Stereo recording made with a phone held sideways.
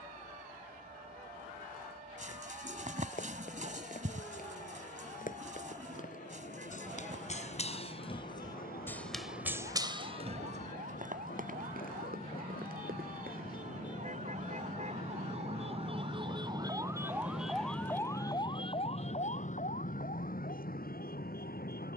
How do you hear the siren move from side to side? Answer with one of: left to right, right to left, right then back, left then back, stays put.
right to left.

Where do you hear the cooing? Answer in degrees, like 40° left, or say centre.
60° right.